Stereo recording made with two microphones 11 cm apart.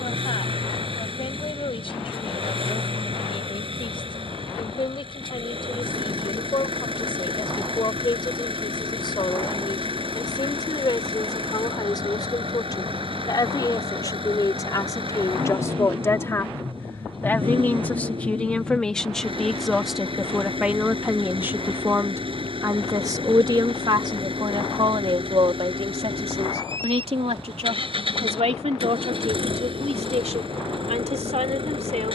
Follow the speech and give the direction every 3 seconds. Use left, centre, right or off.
left, left, left, left, left, left, centre, right, right, right, right.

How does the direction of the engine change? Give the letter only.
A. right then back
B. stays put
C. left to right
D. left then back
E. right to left
B.